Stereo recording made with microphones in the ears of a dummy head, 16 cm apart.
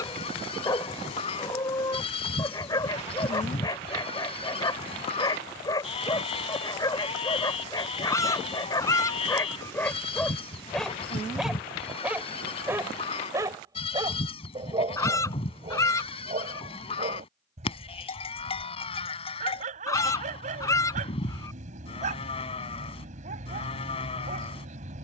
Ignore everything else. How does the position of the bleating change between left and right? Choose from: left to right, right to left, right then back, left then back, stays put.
stays put.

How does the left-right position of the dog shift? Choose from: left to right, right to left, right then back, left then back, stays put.
left to right.